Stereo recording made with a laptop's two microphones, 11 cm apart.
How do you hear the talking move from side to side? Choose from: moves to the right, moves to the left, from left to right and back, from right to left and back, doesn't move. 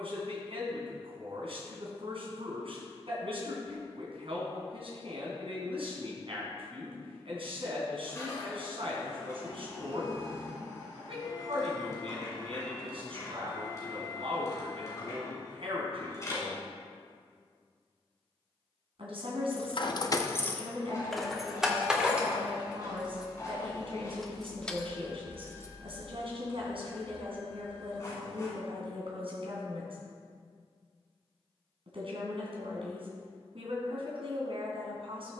doesn't move.